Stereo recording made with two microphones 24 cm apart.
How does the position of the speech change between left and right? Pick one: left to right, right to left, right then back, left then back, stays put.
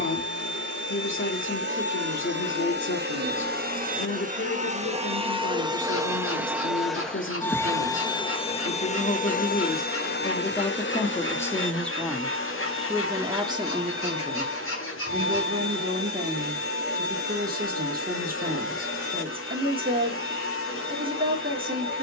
left to right.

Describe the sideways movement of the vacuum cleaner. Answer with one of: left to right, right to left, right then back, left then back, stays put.
right to left.